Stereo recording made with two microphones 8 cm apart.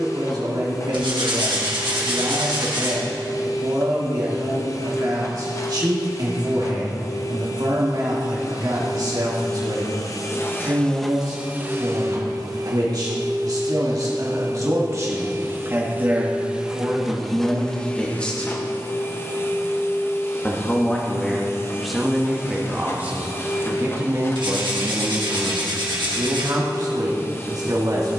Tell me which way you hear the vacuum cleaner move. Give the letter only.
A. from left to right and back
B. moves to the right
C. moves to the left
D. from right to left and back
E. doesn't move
A.